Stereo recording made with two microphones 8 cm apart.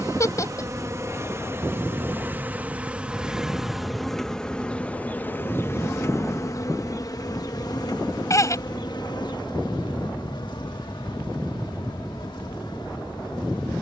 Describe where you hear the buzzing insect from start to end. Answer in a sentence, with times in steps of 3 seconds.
You can hear the buzzing insect on the right from 0 s, in the centre from 3 s and on the left from 6 s.